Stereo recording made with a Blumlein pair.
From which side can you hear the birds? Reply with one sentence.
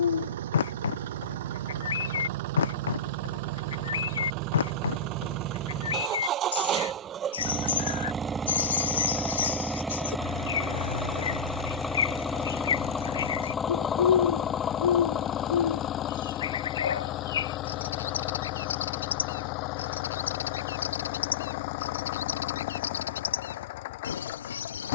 In this clip you hear the birds on the left.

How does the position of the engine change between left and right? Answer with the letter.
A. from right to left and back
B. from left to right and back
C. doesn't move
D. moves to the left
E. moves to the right
D.